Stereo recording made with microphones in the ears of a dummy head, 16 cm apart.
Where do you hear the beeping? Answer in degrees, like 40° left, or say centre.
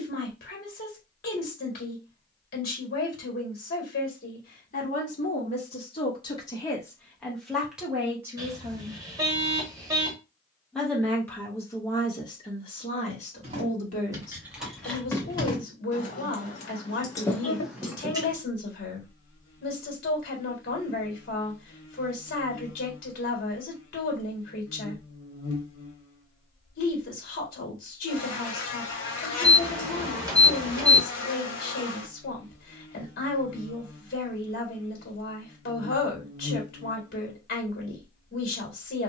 20° right.